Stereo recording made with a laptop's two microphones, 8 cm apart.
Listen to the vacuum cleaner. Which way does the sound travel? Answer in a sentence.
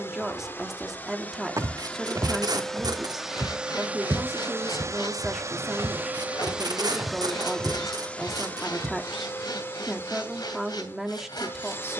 In this clip you hear the vacuum cleaner go right and come back.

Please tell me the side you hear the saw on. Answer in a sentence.
You can hear the saw on the left.